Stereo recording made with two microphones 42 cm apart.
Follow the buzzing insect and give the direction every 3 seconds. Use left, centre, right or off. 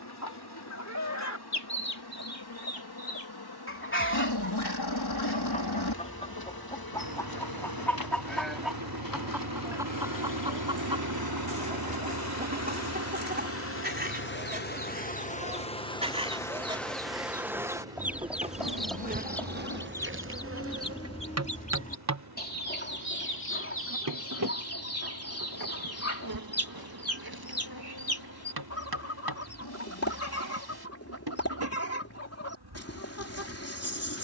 left, left, left, left, left, centre, right, right, right, right, right, right.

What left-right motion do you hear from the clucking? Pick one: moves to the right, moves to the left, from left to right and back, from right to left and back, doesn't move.
from left to right and back.